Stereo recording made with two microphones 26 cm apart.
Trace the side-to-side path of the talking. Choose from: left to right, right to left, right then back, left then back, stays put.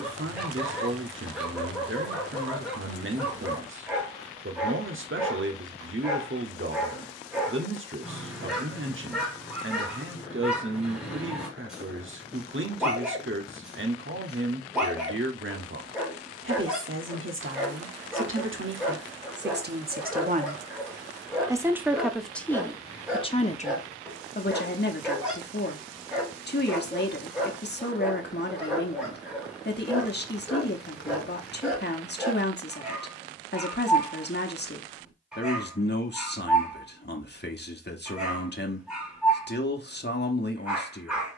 right to left.